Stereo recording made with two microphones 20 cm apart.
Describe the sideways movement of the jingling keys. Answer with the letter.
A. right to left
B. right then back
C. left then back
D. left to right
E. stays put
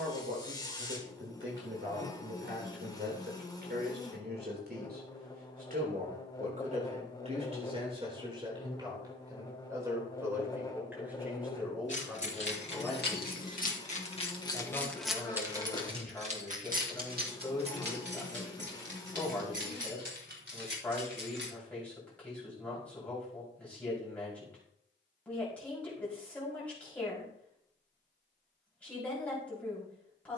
D.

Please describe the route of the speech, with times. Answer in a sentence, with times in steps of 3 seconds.
In this clip you hear the speech on the right from 0 s and in the centre from 9 s.